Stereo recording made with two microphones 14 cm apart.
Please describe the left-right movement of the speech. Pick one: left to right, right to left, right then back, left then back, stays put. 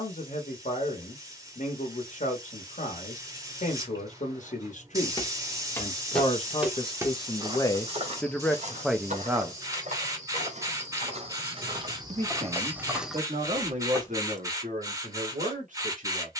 left to right.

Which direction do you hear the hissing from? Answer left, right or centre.
right.